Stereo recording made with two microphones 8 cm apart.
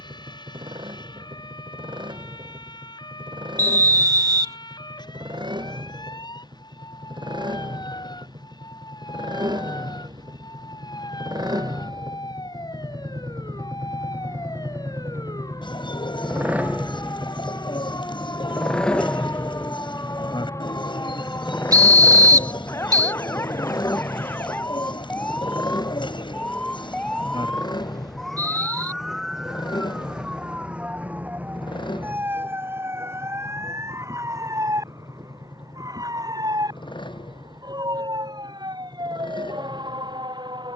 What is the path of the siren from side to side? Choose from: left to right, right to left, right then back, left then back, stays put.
left to right.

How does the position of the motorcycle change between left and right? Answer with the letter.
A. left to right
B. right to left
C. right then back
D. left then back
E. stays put
B.